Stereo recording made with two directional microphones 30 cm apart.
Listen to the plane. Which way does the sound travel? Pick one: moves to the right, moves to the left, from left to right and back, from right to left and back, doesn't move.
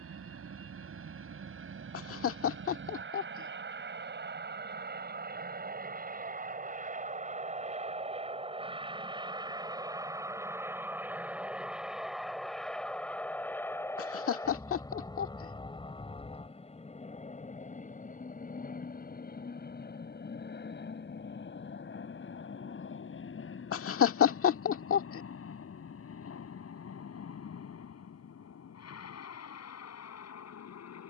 moves to the left.